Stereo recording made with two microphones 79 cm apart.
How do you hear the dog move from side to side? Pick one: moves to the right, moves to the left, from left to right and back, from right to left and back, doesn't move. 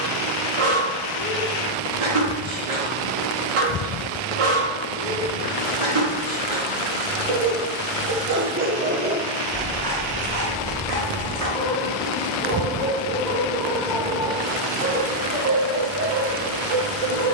from right to left and back.